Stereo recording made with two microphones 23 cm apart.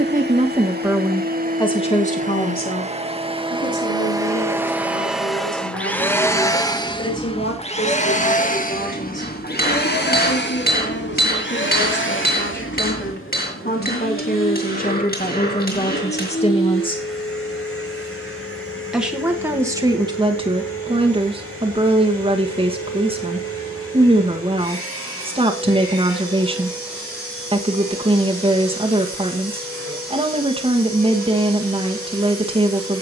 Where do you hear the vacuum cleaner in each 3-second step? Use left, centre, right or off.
right, centre, left, left, left, left, left, left, left, left, left.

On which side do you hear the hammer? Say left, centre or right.
left.